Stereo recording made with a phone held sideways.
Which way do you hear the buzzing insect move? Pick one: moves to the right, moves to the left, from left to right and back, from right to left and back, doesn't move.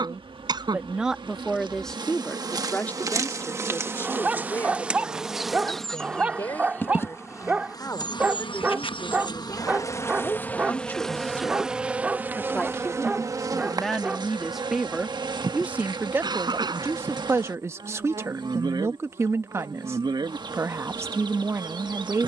from right to left and back.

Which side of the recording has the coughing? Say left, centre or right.
right.